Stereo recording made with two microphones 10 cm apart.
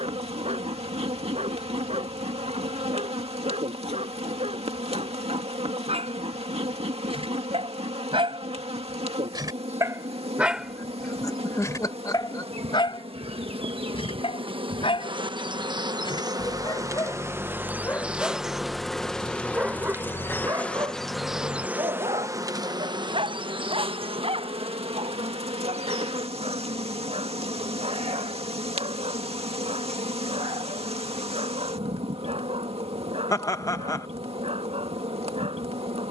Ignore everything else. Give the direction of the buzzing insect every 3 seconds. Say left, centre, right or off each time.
right, right, right, right, right, right, centre, right, right, right, right, right.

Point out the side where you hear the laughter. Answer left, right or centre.
left.